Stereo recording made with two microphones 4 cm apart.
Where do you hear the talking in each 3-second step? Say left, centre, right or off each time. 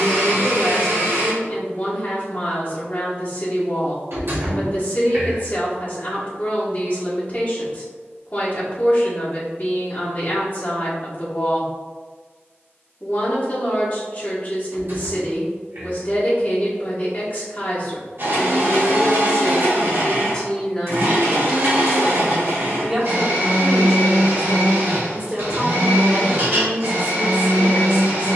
left, left, left, left, left, left, left, centre, right, right.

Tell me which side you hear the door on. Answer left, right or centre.
right.